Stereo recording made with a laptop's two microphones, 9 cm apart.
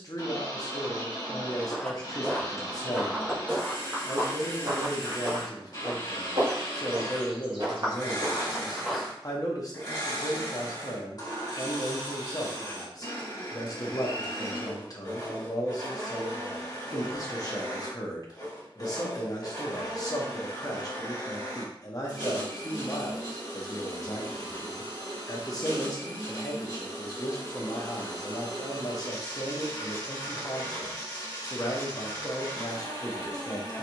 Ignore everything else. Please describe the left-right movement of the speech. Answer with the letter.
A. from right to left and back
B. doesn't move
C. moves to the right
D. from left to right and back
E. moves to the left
B.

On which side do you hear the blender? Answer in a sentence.
You can hear the blender on the left.